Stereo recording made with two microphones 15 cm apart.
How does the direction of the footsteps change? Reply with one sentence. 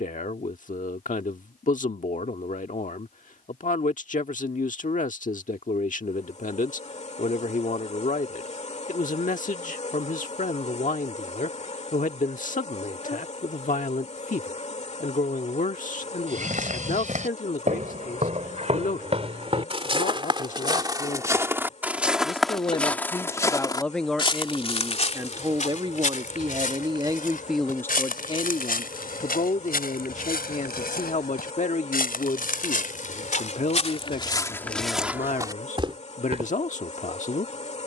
In this clip you hear the footsteps move from right to left and back again.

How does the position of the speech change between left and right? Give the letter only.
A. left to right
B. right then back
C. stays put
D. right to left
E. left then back
B.